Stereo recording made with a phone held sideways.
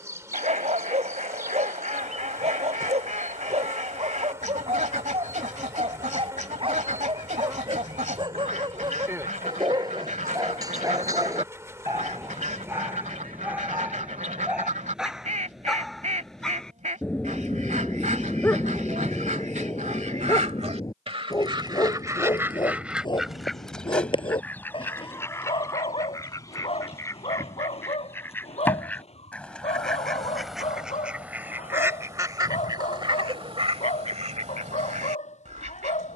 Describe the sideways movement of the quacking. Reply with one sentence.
In this clip you hear the quacking move from right to left and back again.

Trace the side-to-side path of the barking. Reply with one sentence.
You can hear the barking move to the left.